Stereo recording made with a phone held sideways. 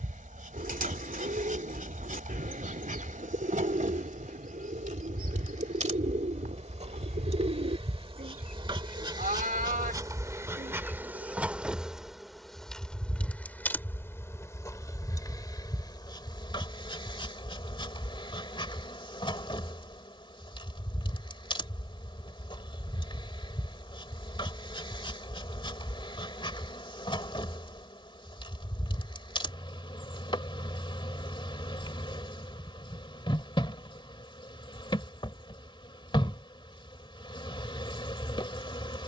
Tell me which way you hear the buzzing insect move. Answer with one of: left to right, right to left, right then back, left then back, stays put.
right to left.